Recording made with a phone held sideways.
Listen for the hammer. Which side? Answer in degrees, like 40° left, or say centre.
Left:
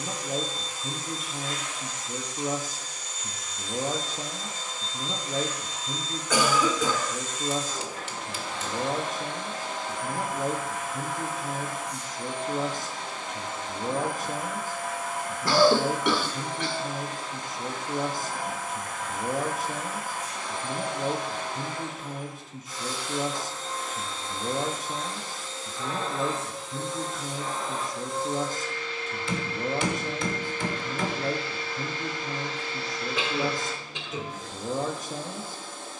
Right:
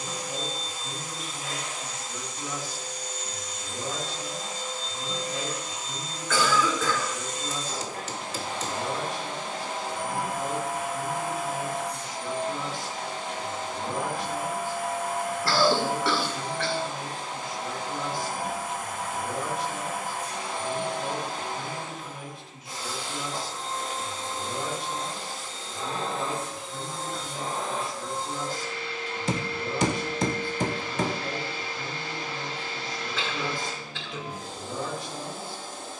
40° right.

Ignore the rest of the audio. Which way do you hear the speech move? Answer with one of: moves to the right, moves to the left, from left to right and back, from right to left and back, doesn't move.
doesn't move.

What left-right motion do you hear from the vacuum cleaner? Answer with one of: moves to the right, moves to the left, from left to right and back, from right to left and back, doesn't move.
doesn't move.